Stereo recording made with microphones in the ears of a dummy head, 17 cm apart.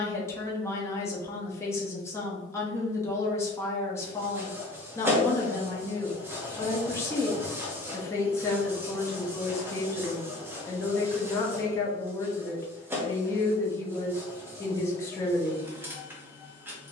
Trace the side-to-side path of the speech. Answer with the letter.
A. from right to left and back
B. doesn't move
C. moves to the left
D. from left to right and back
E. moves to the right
B.